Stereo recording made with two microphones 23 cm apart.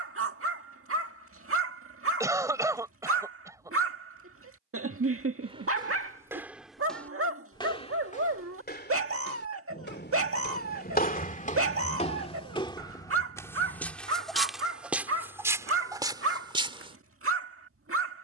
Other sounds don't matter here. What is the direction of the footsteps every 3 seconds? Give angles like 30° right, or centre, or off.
off, 20° right, 20° left, 40° left, 10° left, 20° right.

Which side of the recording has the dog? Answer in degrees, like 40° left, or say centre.
70° right.